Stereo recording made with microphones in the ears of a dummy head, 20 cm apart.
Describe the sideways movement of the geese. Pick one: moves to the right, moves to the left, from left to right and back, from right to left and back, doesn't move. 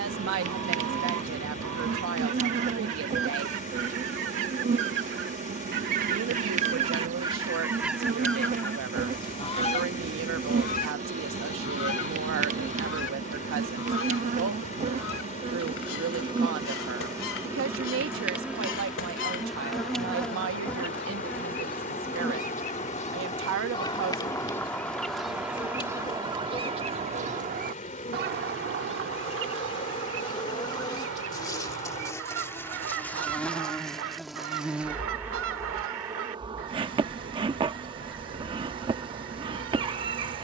from right to left and back.